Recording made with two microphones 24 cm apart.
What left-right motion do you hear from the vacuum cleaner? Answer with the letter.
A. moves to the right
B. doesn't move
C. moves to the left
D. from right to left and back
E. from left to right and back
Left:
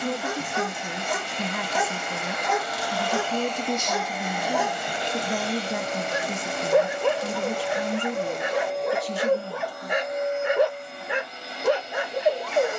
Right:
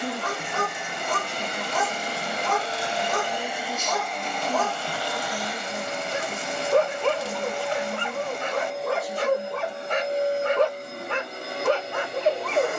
D.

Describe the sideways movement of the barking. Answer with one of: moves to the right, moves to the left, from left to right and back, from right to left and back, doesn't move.
doesn't move.